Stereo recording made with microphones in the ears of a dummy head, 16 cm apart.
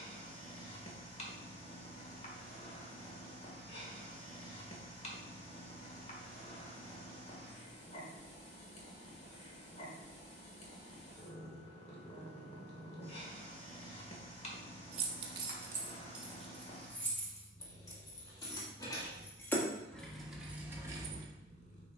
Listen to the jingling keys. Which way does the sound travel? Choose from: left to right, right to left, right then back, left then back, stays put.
left then back.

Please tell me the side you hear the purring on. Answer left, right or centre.
left.